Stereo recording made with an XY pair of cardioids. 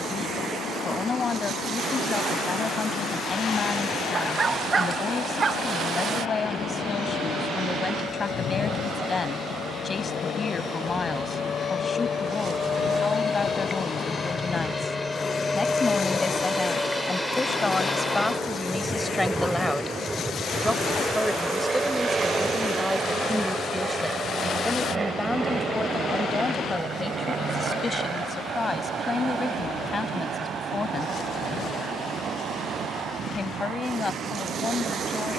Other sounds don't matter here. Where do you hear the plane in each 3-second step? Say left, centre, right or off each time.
left, left, left, left, left, centre, centre, right, right, right, right, right.